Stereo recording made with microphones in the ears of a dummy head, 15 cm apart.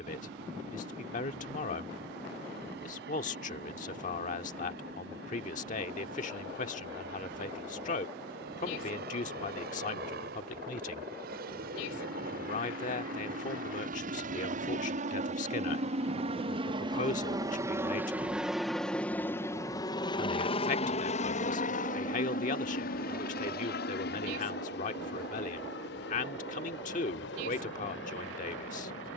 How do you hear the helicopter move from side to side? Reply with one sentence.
In this clip you hear the helicopter move to the left.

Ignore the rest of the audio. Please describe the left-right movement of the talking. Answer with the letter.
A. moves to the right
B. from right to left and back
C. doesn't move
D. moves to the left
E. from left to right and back
C.